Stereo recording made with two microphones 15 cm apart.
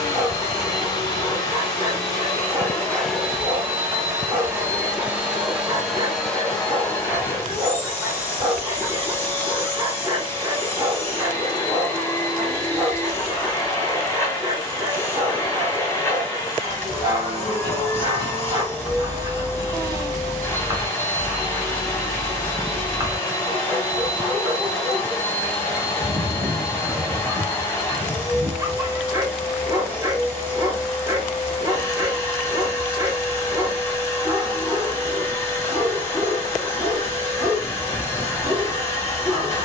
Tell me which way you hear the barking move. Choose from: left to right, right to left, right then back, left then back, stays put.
stays put.